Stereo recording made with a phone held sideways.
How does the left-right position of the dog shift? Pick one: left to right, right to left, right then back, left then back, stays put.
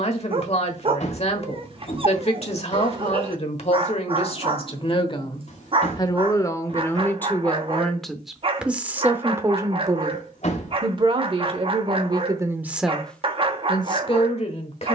stays put.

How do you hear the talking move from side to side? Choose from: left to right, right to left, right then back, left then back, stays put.
right then back.